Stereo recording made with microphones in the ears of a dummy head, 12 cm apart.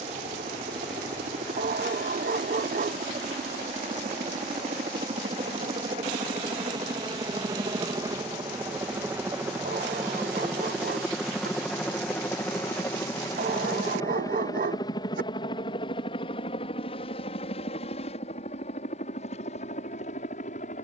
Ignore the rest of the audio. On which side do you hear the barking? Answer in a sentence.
In this clip you hear the barking on the right.